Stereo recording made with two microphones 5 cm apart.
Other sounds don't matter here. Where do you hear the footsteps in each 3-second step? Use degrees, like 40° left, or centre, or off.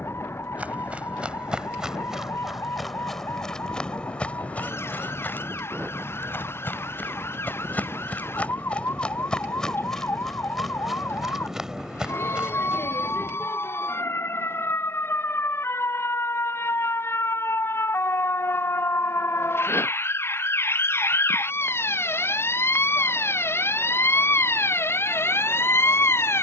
10° right, 20° left, 40° left, centre, 20° right, off, off, off, off.